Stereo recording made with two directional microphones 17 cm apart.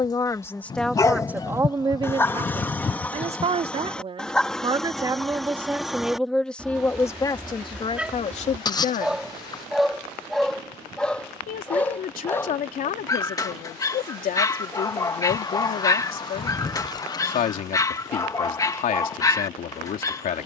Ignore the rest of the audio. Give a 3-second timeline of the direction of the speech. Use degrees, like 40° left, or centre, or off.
10° right, 30° right, 20° left, 50° left, 50° left, 50° left, 50° left.